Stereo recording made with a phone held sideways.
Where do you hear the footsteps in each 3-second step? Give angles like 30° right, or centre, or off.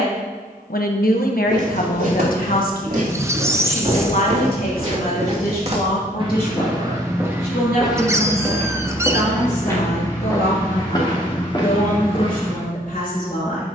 80° right, 60° right, 10° right, 30° left, 40° left.